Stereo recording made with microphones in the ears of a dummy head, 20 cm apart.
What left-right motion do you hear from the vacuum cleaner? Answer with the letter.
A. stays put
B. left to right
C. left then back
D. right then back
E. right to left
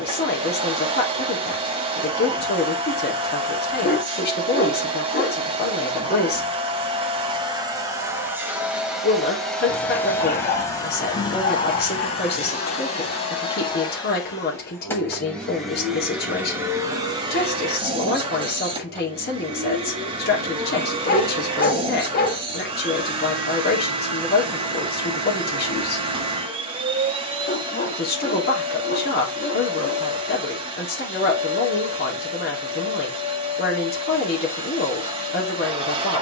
C.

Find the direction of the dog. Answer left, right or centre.
left.